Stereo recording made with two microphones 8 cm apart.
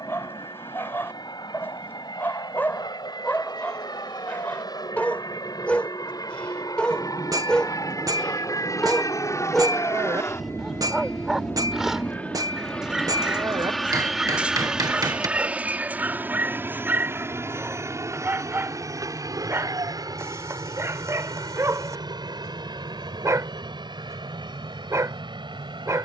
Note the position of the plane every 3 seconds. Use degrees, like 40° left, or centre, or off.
70° left, 60° left, 50° left, 30° left, centre, 20° right, 40° right, 60° right, 60° right.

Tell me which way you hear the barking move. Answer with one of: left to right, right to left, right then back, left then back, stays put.
left to right.